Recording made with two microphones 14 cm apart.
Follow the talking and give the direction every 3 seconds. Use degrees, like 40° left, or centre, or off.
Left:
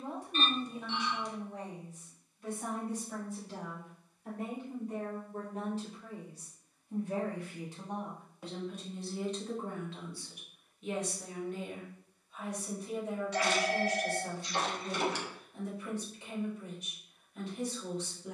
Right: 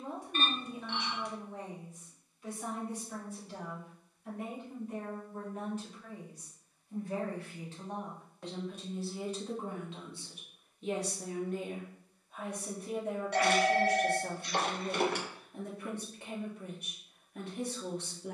50° left, 40° left, 10° left, 20° right, 50° right, 50° right.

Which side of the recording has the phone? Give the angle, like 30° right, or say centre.
60° right.